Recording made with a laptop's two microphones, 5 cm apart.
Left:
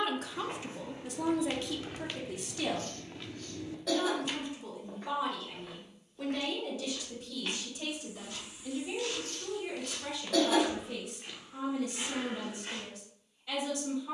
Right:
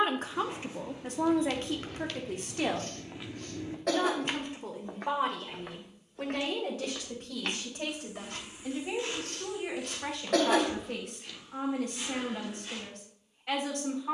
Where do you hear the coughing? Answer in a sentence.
In this clip you hear the coughing on the right.